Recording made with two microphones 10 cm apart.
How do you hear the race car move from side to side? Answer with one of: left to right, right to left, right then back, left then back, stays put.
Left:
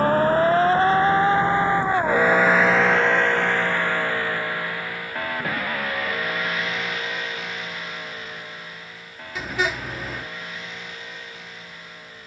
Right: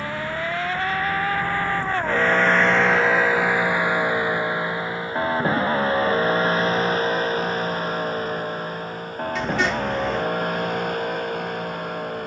left to right.